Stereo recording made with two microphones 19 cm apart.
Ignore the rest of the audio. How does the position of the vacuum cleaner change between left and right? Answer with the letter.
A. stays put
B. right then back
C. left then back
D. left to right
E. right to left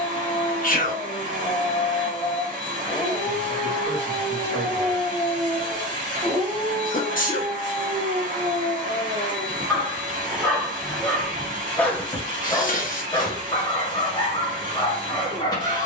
A.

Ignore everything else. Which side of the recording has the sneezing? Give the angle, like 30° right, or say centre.
40° left.